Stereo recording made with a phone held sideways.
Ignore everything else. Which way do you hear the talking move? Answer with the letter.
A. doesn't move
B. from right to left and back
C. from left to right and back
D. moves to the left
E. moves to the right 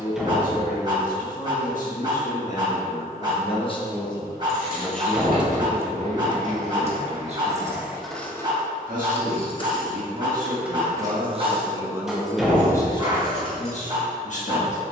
C.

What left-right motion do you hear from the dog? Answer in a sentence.
You can hear the dog stay put.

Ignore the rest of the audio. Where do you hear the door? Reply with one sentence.
You can hear the door in the centre.